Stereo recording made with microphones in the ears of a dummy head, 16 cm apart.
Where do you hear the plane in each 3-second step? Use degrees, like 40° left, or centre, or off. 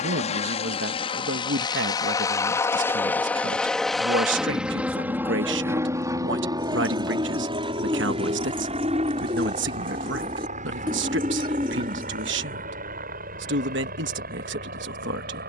30° left, centre, 30° right, 40° right, 50° right.